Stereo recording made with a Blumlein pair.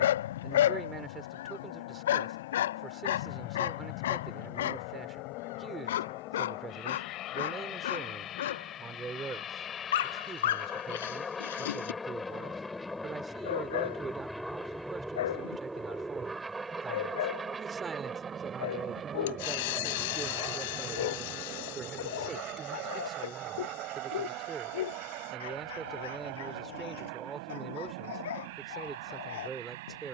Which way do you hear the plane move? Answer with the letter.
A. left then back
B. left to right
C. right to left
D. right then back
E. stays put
B.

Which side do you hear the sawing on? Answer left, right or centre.
left.